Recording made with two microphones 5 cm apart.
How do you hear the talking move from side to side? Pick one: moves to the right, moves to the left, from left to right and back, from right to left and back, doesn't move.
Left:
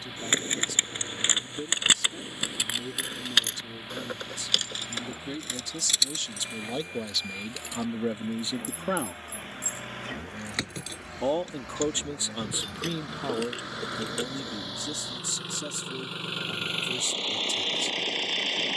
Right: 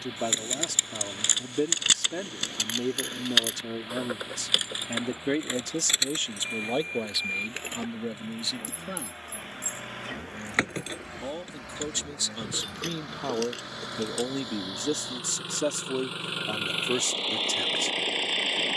from right to left and back.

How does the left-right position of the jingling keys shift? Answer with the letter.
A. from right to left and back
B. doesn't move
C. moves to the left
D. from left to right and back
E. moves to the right
D.